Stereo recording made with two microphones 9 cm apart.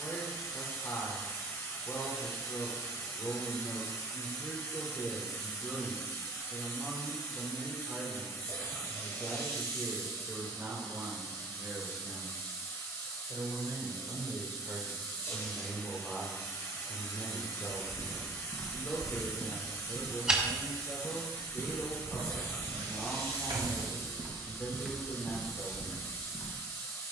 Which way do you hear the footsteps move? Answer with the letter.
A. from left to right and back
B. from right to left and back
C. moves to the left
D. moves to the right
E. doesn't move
A.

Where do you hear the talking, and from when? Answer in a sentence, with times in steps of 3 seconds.
You can hear the talking on the left from 0 s, in the centre from 6 s, on the right from 9 s, in the centre from 15 s and on the left from 18 s.